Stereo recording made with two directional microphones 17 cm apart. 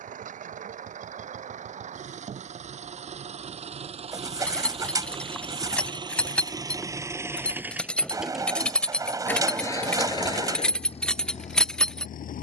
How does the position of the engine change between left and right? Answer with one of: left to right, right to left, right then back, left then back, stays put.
right to left.